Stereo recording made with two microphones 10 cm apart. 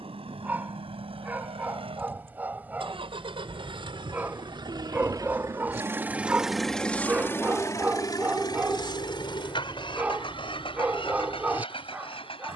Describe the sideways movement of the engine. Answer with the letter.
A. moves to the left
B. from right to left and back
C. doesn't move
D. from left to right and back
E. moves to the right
A.